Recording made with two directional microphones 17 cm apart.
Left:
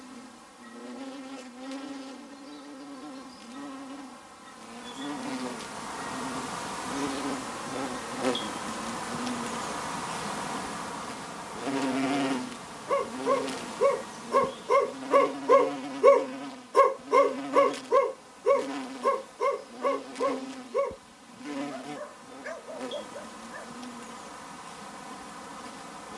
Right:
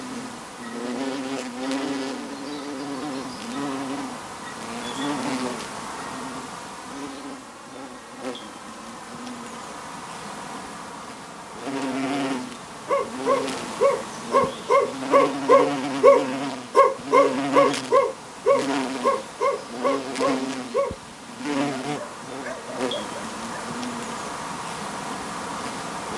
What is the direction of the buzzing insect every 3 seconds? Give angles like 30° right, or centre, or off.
70° right, 50° right, 10° left, centre, 30° right, 50° right, 60° right, 60° right, 60° right.